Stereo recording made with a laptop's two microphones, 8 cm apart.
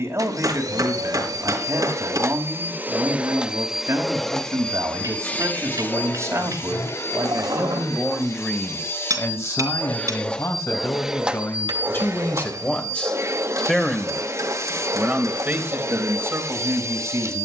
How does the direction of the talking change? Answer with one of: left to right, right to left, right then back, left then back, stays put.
left then back.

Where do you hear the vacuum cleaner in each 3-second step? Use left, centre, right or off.
right, centre, left, centre, right, right.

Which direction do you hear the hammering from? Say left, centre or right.
right.